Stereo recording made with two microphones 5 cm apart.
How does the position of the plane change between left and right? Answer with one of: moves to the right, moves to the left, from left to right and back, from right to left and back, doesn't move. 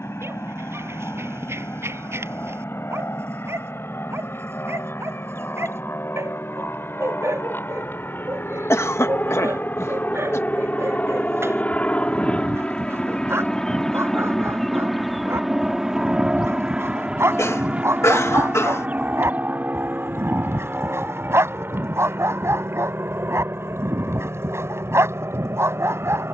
moves to the right.